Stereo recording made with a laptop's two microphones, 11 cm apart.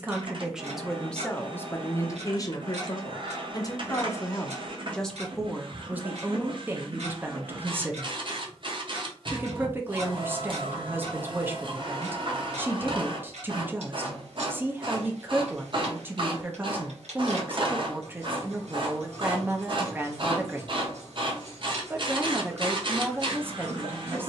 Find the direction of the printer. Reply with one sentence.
In this clip you hear the printer on the right.